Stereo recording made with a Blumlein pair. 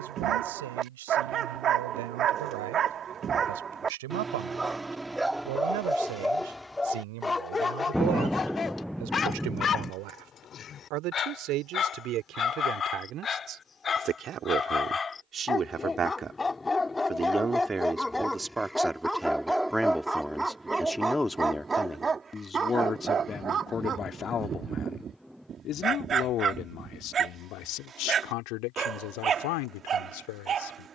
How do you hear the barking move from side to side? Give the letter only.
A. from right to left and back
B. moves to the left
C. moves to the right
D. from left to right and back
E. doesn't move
A.